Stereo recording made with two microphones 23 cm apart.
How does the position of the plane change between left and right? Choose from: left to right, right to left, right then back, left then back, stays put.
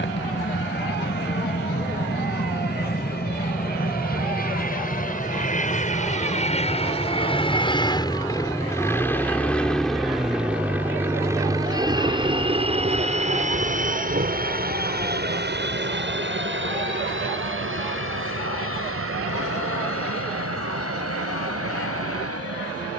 left to right.